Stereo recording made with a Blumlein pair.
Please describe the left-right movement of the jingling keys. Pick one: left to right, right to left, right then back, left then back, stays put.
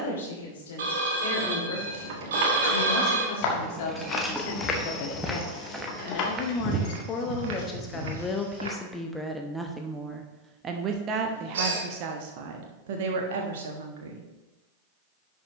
right to left.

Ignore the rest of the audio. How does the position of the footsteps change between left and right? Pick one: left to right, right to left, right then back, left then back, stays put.
left to right.